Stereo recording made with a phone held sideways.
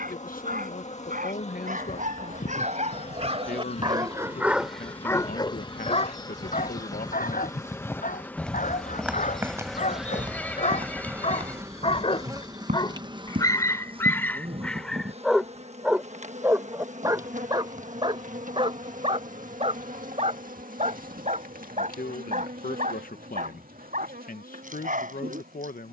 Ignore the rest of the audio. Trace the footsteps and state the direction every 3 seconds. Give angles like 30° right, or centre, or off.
60° left, 50° left, 20° left, 30° right, 60° right, off, off, off, off.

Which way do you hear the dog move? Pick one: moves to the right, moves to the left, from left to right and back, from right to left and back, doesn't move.
from right to left and back.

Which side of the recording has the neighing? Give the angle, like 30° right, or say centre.
10° left.